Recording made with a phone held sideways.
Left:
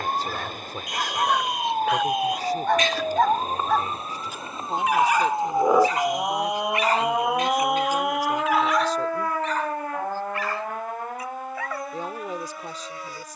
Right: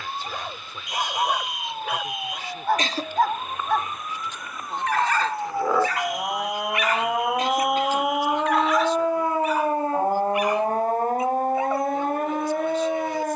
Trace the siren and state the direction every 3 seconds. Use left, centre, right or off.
left, left, centre, right, right.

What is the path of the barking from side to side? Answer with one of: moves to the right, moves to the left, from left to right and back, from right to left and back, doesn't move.
from right to left and back.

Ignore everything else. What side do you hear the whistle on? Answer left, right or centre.
centre.